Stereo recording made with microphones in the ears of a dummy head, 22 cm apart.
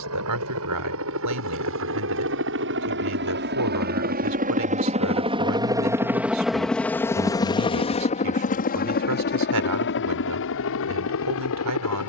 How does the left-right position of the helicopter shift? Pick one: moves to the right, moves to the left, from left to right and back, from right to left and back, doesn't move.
moves to the left.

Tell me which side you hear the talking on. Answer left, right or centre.
right.